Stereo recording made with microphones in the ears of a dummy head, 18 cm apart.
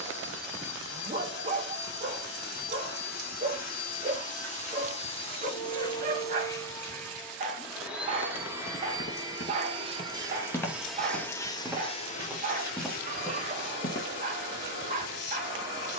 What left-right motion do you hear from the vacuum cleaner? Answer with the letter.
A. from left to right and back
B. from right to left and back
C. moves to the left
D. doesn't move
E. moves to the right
A.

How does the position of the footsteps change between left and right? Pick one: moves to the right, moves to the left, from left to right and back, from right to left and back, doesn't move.
from left to right and back.